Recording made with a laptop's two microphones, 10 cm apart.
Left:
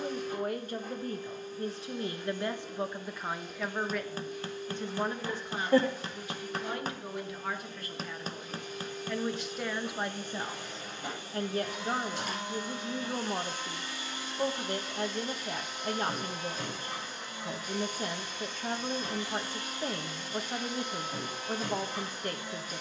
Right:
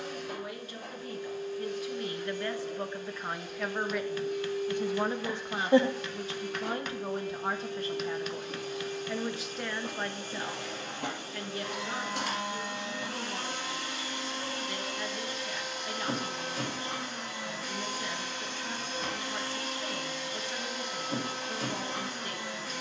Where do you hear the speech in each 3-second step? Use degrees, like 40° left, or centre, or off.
30° left, 10° right, 30° right, 20° left, 40° left, 40° left, 40° left, 40° left.